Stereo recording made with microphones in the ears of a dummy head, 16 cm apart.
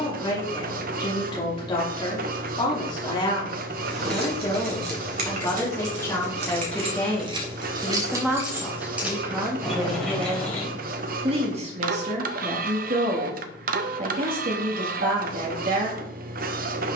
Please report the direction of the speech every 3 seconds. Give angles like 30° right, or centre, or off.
30° left, 20° left, centre, 20° right, 50° right, 50° right.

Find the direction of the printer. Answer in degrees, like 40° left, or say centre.
50° right.